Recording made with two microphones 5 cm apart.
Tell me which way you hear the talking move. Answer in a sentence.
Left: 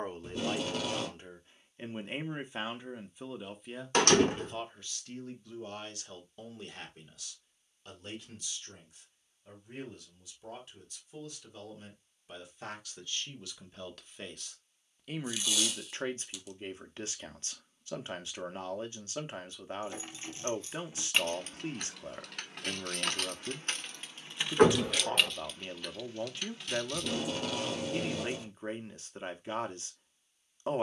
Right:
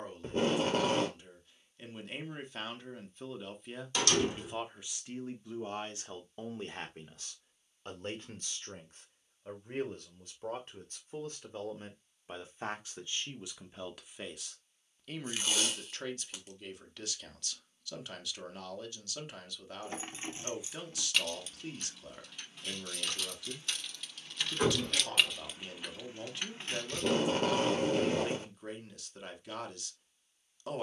In this clip you hear the talking go right and come back.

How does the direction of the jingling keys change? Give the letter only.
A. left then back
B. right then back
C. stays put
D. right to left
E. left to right
A.